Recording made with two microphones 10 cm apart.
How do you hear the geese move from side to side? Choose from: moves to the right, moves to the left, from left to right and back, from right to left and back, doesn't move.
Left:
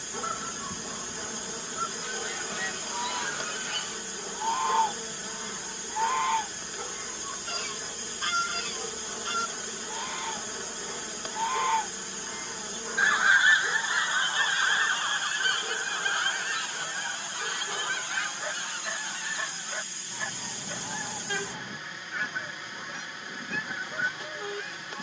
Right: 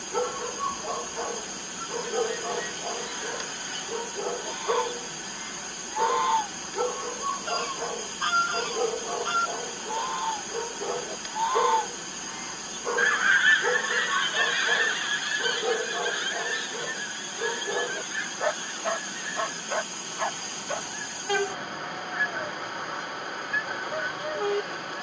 from left to right and back.